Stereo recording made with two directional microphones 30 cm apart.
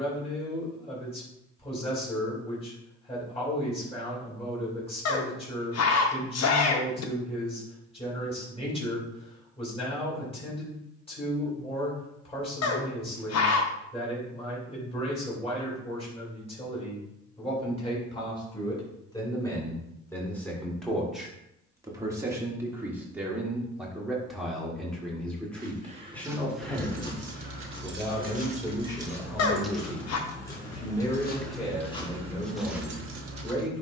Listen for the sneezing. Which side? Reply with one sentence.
In this clip you hear the sneezing on the left.